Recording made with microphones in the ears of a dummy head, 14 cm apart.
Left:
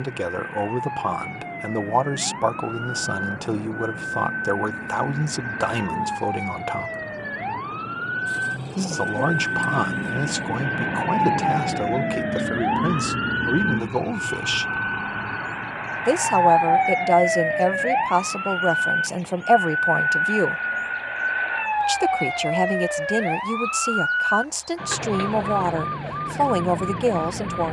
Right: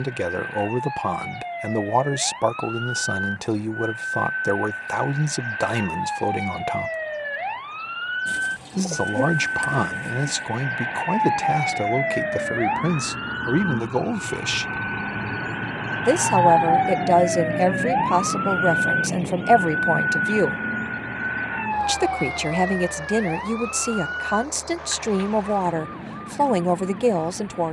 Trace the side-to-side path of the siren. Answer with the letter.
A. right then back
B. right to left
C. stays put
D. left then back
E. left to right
B.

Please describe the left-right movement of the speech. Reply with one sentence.
In this clip you hear the speech stay in one place.